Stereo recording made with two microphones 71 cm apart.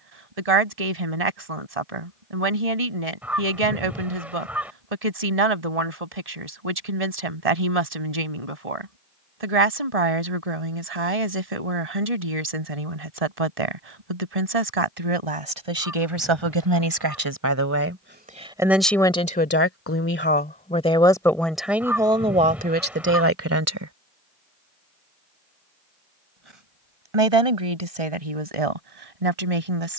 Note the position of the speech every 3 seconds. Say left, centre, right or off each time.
right, right, right, right, right, right, centre, centre, off, right.